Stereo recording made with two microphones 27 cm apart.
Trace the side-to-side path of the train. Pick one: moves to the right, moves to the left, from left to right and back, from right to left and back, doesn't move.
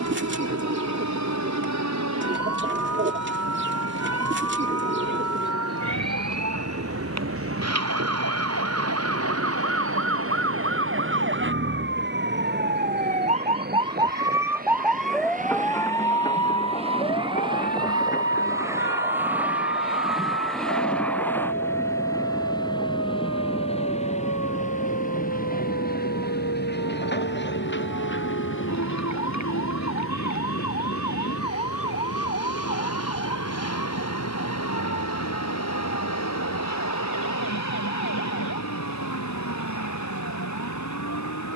moves to the left.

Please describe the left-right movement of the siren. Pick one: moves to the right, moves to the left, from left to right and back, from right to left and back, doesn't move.
moves to the left.